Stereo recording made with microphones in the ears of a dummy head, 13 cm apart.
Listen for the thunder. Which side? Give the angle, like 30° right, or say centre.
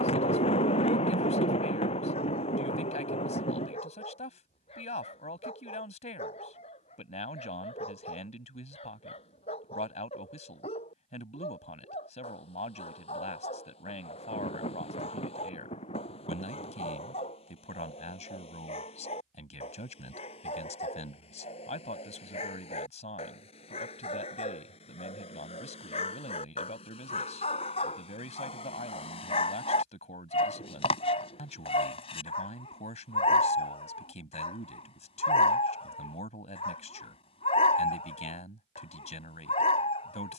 40° left.